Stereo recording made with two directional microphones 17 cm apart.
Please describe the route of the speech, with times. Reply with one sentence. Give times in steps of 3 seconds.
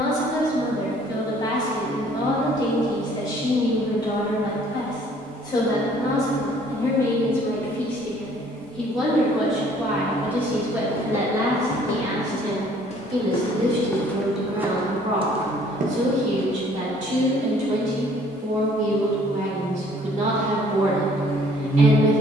In this clip you hear the speech on the left from 0 s, in the centre from 6 s and on the right from 12 s.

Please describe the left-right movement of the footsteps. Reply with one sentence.
You can hear the footsteps move to the right.